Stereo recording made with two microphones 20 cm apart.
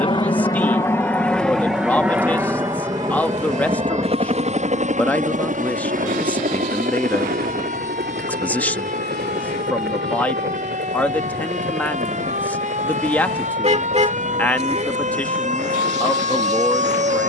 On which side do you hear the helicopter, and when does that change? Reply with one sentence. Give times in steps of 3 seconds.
You can hear the helicopter in the centre from 0 s and on the right from 3 s.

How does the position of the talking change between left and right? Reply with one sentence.
In this clip you hear the talking stay in one place.